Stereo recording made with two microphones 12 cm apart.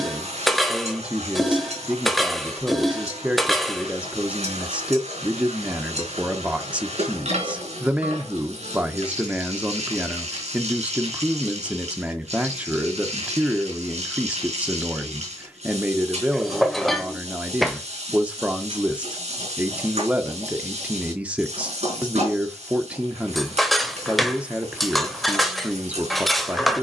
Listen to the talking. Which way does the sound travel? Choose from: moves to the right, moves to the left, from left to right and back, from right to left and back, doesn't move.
doesn't move.